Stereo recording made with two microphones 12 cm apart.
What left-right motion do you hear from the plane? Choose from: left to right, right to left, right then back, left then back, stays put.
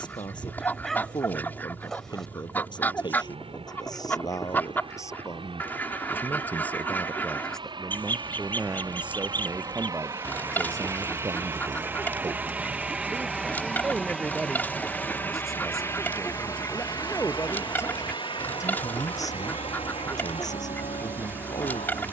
right to left.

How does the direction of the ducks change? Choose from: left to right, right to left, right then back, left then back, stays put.
stays put.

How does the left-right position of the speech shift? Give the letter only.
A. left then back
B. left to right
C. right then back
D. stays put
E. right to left
C.